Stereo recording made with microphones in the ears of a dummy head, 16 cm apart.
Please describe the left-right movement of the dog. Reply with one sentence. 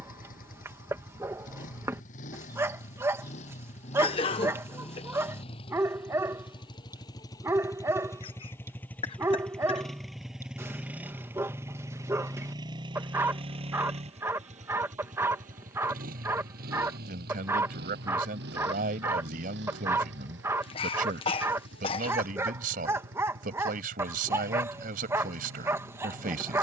In this clip you hear the dog stay put.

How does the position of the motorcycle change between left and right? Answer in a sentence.
In this clip you hear the motorcycle move from left to right.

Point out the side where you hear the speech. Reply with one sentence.
You can hear the speech on the right.